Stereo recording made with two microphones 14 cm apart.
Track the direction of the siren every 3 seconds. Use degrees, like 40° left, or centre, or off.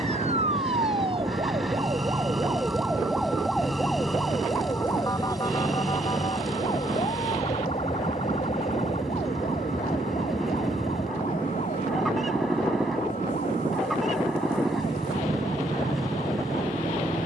30° right, 10° left, 40° left, 50° left, 60° left, 60° left.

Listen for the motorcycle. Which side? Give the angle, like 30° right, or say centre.
centre.